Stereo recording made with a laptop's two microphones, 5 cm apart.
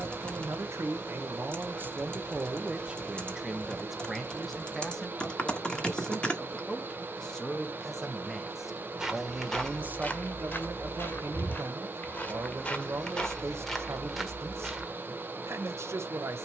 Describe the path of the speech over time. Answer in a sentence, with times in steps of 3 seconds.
You can hear the speech on the right from 0 s, in the centre from 3 s and on the right from 9 s.